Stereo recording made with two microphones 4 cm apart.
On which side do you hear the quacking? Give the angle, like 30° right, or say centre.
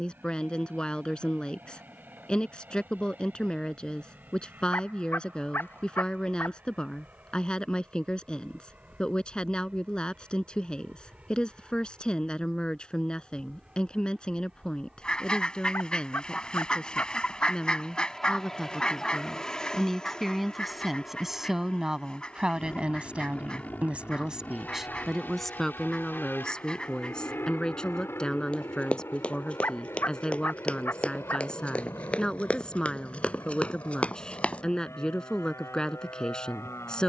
20° left.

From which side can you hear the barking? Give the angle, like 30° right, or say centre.
50° left.